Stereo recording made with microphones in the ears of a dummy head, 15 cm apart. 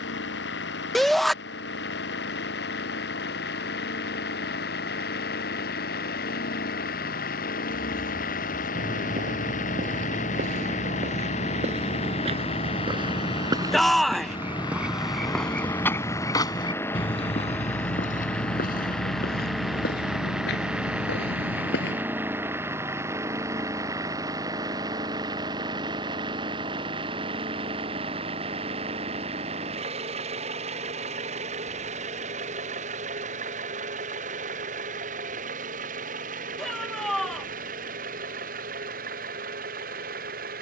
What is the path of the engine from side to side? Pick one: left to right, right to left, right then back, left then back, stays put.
left to right.